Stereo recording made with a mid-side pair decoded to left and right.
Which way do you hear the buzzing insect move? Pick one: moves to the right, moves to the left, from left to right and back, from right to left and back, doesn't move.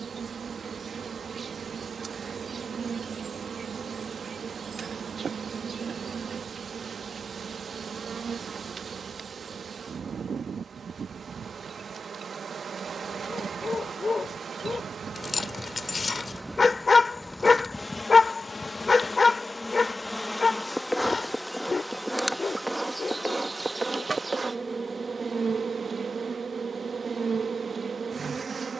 from right to left and back.